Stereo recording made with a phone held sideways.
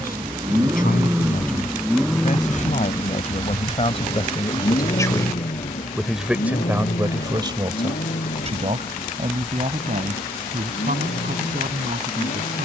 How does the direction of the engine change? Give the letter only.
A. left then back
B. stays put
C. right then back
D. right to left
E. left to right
D.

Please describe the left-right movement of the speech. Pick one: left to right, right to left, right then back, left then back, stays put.
left to right.